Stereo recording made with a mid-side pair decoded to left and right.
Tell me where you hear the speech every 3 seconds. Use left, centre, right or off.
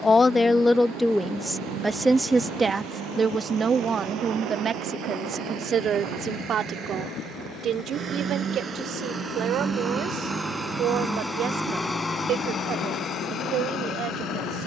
centre, right, right, right, right.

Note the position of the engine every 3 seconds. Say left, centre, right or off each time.
right, right, right, centre, left.